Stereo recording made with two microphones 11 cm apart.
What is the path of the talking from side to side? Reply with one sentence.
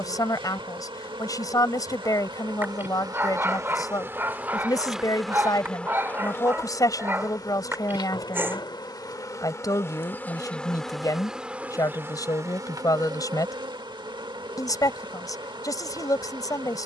You can hear the talking stay in one place.